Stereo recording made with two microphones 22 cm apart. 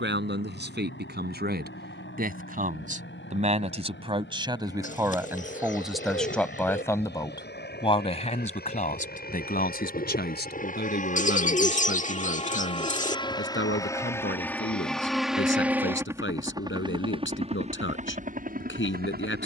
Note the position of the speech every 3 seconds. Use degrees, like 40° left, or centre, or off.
50° right, 20° right, 20° left, 50° left, 60° left, 60° left, 60° left.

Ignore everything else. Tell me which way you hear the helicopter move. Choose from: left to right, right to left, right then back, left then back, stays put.
left to right.